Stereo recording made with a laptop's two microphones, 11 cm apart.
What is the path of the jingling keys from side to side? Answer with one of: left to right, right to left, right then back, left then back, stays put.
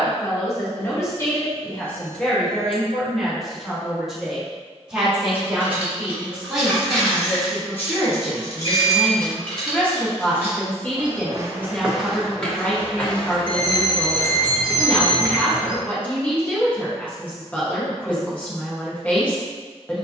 left then back.